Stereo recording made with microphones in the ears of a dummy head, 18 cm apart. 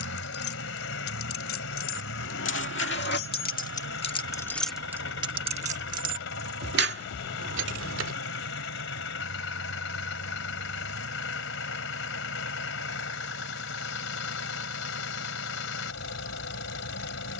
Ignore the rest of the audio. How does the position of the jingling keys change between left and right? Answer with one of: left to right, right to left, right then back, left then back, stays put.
left to right.